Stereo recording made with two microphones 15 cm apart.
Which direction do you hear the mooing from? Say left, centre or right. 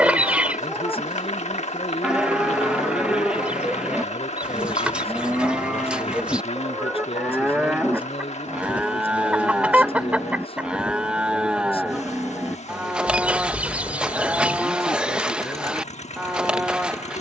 centre.